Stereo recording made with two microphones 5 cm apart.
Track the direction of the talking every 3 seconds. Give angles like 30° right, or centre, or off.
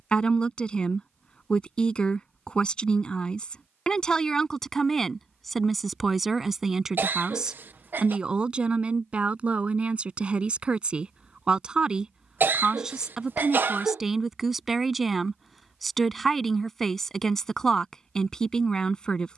20° left, 10° left, 10° right, 20° right, 10° right, centre, 10° left.